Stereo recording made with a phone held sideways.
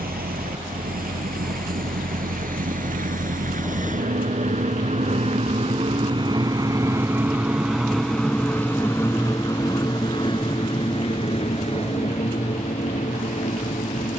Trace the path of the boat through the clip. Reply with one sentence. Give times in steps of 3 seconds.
In this clip you hear the boat on the right from 0 s, in the centre from 6 s and on the left from 9 s.